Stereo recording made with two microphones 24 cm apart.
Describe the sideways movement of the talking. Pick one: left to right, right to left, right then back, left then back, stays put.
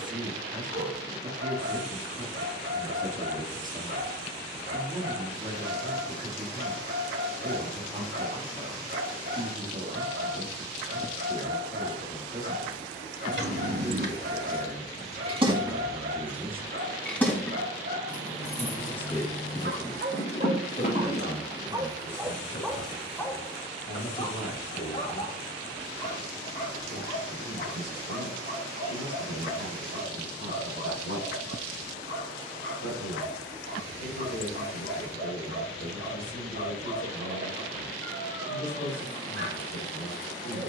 right to left.